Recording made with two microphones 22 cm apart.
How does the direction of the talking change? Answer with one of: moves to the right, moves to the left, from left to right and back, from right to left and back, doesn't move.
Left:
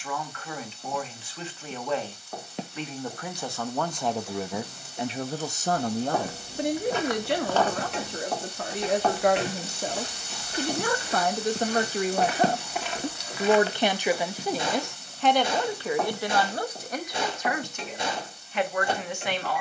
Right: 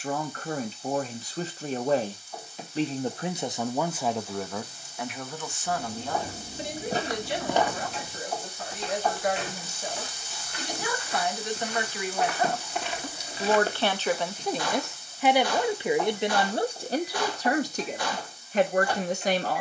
from right to left and back.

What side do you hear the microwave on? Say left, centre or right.
left.